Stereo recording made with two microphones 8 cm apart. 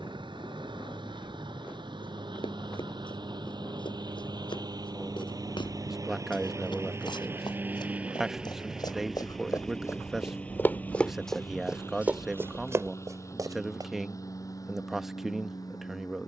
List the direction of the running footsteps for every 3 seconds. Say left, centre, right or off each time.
left, left, left, left, right, off.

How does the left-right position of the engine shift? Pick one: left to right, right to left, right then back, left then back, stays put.
right to left.